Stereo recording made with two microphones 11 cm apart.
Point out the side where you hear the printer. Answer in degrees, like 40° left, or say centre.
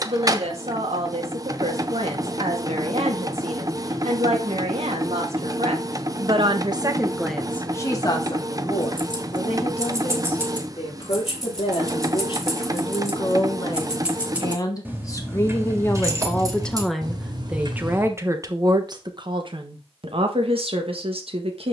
30° right.